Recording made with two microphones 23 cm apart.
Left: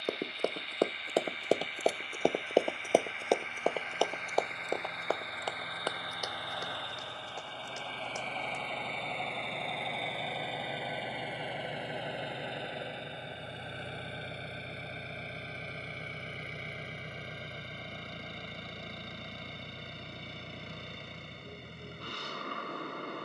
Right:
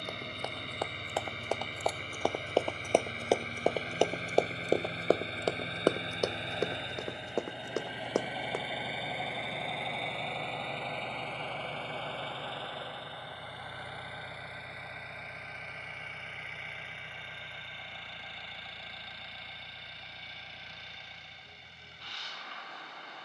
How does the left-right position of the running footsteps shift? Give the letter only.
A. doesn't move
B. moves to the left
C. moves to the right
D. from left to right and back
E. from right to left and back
C.